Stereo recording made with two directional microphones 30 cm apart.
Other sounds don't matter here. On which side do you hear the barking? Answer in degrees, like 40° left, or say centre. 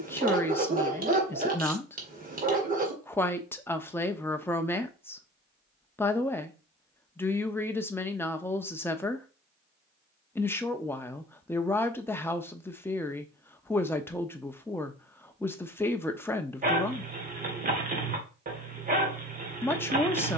30° right.